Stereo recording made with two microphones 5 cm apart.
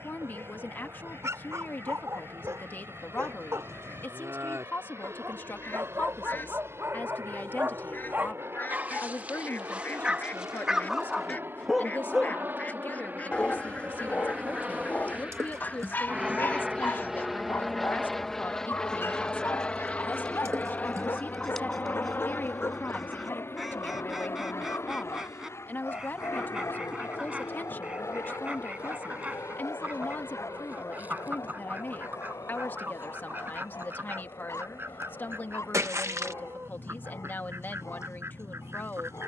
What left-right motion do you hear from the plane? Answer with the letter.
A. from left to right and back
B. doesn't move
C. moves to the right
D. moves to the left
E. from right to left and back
D.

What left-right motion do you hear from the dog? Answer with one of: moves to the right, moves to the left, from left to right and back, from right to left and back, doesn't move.
moves to the left.